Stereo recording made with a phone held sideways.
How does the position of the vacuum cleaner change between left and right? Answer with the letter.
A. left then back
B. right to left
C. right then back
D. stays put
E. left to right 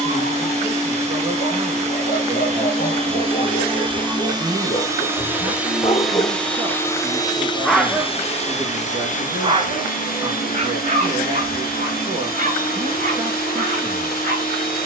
B.